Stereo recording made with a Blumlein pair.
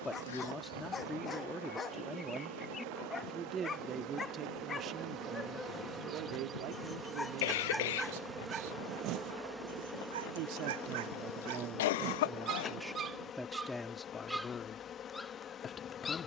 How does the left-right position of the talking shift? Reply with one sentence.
In this clip you hear the talking move from left to right and back again.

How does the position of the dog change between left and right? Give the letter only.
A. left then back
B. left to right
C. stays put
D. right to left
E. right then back
E.